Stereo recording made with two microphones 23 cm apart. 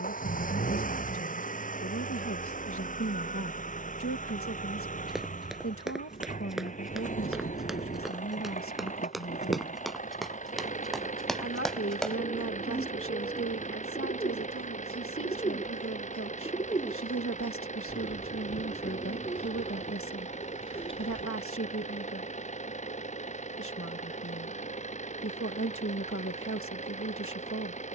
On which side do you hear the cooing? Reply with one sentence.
You can hear the cooing on the left.